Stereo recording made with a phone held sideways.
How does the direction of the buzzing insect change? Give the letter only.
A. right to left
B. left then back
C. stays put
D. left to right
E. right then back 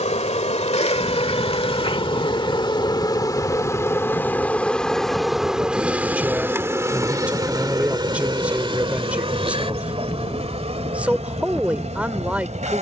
D.